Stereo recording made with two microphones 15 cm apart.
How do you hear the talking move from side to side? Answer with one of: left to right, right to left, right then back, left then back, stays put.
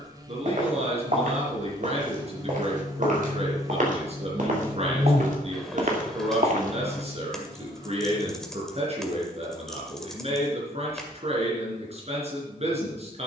stays put.